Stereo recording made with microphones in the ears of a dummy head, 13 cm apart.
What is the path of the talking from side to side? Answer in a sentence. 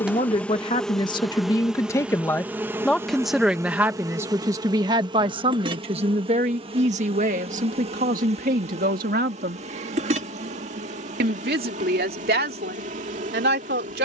In this clip you hear the talking move to the right.